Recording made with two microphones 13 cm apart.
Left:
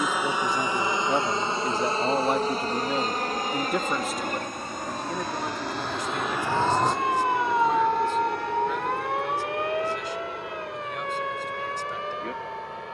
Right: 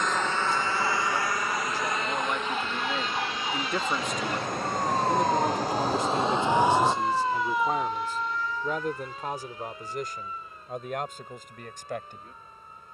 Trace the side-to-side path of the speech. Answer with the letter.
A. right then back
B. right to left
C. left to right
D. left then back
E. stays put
C.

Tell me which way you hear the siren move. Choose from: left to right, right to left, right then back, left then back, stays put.
right to left.